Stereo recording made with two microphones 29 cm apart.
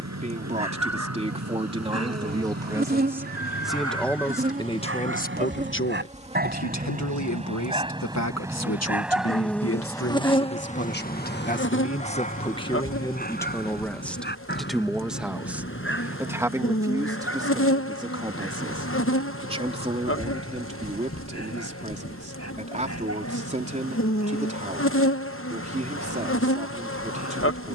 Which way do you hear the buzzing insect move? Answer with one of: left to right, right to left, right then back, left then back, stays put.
right to left.